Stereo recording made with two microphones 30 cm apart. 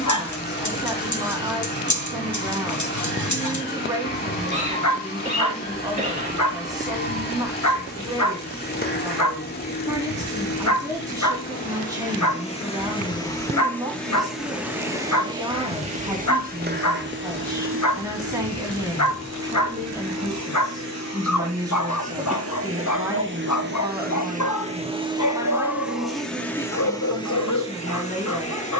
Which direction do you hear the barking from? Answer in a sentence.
In this clip you hear the barking on the left.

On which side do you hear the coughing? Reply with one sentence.
You can hear the coughing on the right.